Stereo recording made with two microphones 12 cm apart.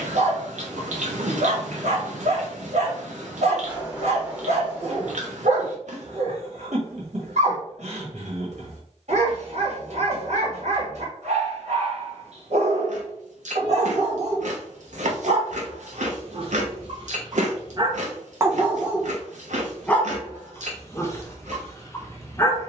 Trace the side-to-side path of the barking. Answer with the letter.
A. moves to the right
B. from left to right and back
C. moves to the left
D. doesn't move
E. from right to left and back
C.